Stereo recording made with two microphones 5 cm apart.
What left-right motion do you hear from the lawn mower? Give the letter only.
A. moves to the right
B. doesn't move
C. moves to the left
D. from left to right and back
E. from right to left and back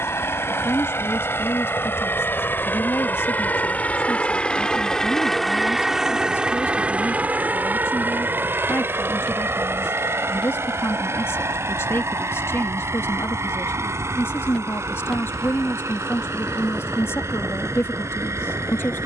A.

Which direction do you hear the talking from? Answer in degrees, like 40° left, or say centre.
60° left.